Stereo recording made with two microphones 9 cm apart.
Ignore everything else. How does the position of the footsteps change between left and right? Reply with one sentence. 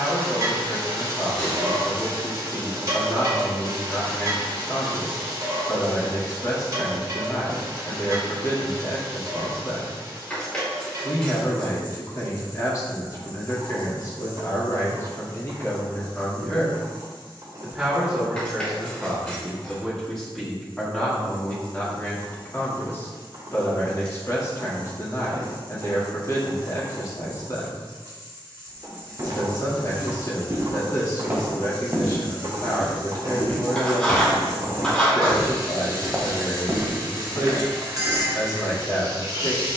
You can hear the footsteps go left and come back.